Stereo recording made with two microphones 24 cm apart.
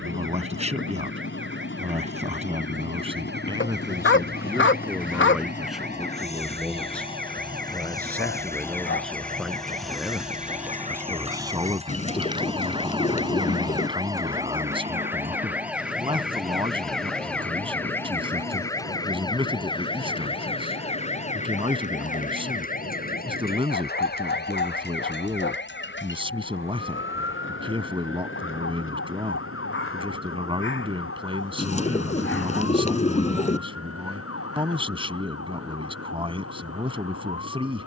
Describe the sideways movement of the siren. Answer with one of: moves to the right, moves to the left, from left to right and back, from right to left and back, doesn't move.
moves to the left.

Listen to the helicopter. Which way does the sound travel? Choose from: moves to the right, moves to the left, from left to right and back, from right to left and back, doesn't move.
moves to the right.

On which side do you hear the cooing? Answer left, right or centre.
left.